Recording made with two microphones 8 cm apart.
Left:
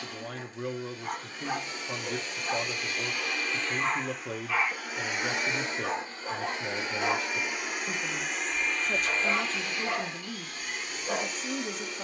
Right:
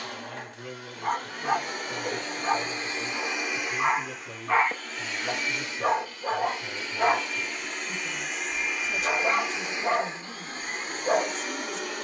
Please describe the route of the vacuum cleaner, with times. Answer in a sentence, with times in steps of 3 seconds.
You can hear the vacuum cleaner on the right from 0 s, in the centre from 3 s and on the right from 9 s.